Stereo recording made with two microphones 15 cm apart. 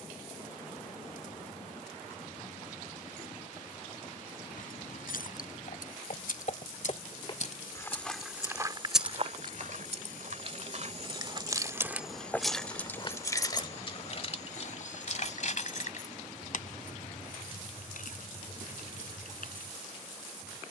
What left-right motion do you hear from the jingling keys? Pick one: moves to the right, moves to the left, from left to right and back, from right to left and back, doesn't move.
from left to right and back.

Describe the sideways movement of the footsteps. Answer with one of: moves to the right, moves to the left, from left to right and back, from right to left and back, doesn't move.
from left to right and back.